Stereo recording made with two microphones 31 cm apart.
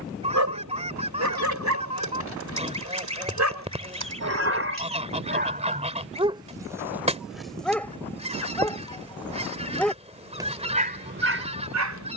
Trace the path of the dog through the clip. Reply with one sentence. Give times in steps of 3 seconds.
You can hear the dog on the right from 0 s, in the centre from 6 s and on the right from 9 s.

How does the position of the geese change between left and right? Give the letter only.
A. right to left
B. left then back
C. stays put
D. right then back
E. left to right
C.